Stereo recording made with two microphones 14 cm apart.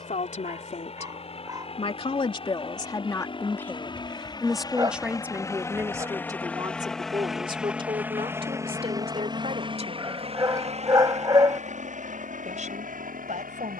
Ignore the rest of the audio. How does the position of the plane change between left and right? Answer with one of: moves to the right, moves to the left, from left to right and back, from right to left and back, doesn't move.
moves to the right.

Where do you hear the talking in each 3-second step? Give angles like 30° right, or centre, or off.
40° left, centre, 30° right, 50° right, 60° right.